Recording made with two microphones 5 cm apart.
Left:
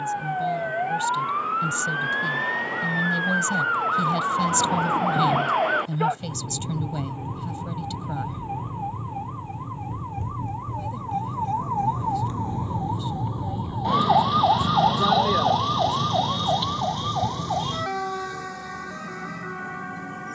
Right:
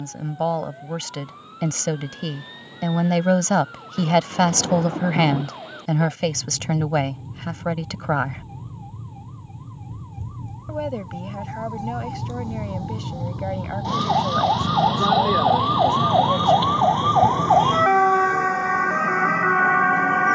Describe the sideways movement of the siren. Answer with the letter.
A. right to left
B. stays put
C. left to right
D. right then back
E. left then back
C.